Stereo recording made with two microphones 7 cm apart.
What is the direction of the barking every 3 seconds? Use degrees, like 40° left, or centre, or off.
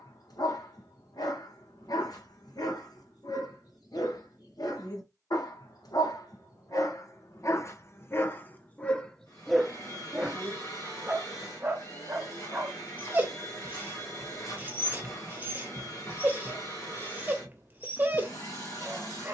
70° left, 70° left, 40° left, 10° right, 30° right, 30° right, 30° right.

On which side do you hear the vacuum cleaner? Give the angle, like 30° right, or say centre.
50° left.